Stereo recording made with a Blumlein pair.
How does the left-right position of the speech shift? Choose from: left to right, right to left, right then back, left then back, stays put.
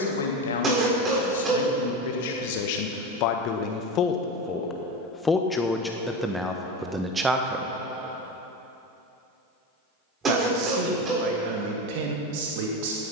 left to right.